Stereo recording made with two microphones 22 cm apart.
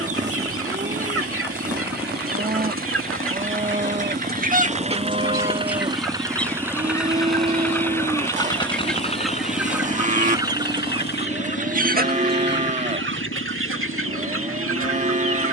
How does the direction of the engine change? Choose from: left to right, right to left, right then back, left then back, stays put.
right to left.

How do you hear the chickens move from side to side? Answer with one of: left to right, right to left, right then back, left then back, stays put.
left then back.